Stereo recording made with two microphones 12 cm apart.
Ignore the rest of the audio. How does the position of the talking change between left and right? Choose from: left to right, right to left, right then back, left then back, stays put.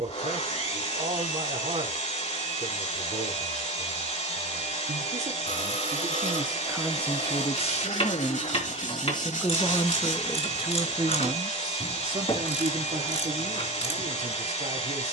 left then back.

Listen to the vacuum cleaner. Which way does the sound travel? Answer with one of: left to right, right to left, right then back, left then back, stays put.
stays put.